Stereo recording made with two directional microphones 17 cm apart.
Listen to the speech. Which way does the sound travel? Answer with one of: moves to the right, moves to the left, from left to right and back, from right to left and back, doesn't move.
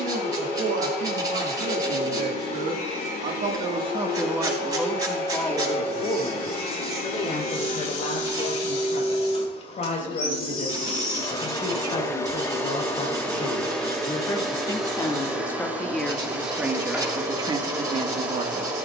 from right to left and back.